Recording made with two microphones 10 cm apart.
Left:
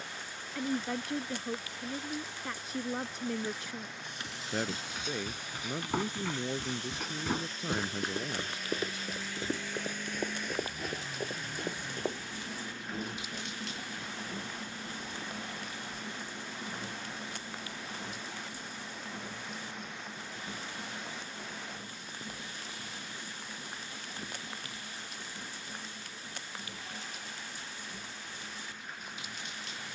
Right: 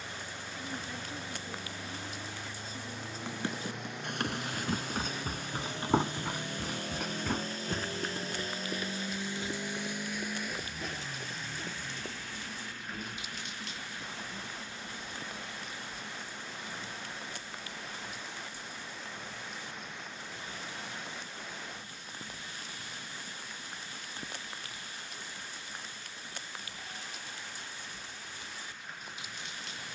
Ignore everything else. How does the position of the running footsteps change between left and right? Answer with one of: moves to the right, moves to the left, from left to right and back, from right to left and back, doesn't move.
moves to the left.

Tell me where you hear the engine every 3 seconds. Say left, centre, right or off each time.
right, right, right, centre, left, left, left, left, left, left.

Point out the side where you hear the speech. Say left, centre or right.
left.